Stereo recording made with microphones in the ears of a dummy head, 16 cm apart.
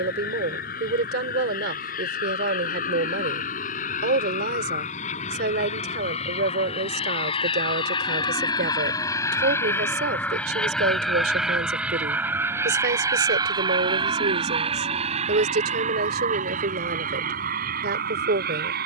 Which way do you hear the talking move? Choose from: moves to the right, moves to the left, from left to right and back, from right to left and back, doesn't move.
doesn't move.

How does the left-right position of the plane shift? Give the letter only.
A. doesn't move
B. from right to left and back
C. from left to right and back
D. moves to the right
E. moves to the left
D.